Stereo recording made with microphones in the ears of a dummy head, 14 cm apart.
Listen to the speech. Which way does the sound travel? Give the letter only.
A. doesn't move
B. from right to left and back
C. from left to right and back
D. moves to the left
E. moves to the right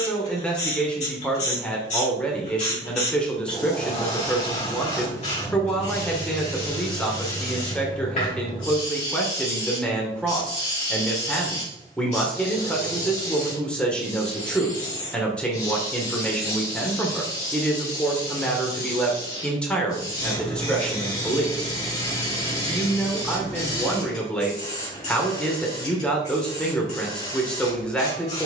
A.